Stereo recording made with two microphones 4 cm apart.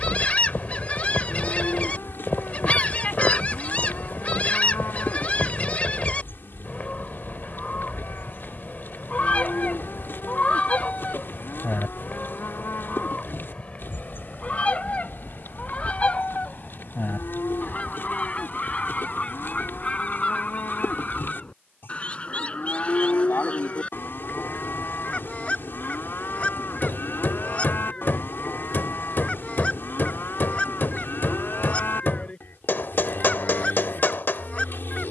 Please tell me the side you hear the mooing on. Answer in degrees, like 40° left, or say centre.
50° left.